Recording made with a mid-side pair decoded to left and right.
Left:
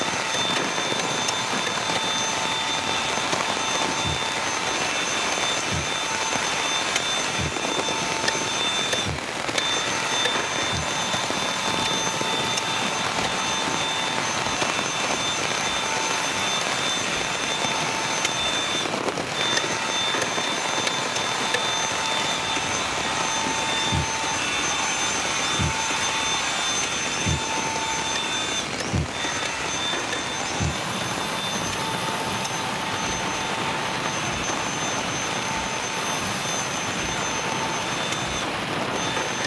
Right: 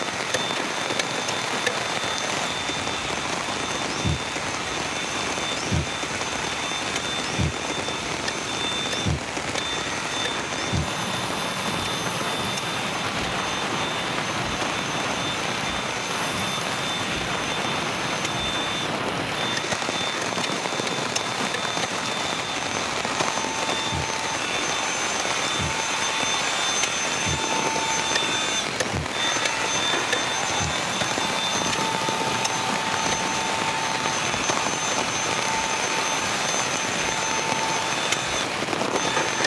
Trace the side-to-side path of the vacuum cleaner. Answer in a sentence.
You can hear the vacuum cleaner move to the right.